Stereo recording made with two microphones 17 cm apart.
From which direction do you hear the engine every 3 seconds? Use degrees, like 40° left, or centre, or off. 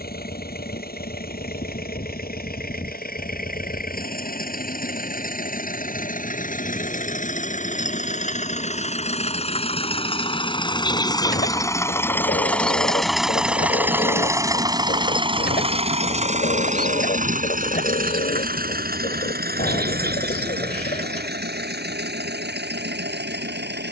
60° left, 60° left, 50° left, 30° left, 10° right, 40° right, 60° right, 70° right.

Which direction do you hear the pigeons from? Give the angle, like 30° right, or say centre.
60° left.